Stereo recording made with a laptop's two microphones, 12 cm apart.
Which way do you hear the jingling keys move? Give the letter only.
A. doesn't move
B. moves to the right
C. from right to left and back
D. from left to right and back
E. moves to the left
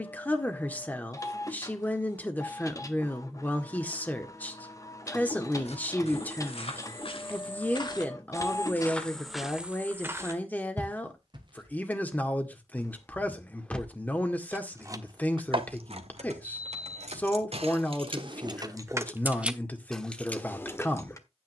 D.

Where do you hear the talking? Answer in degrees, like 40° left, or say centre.
10° left.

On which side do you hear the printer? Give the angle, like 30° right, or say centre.
30° left.